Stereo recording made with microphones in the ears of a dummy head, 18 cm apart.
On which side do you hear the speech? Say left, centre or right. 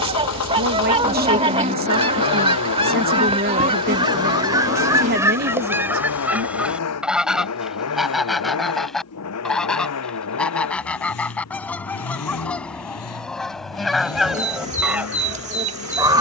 right.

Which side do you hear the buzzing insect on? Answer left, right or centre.
right.